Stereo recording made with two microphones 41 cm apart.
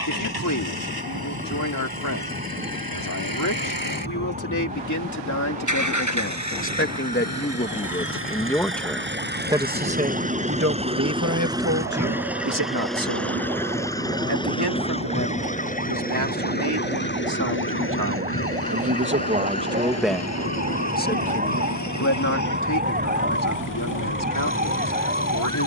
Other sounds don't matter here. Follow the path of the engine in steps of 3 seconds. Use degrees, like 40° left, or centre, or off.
60° right, 50° right, 40° right, 20° right, centre, 20° left, 40° left, 50° left, 50° left.